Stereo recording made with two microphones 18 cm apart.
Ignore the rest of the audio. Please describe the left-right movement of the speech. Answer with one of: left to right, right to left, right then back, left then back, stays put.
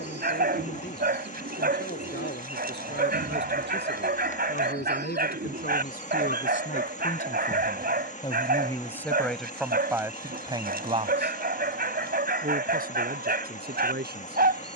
left to right.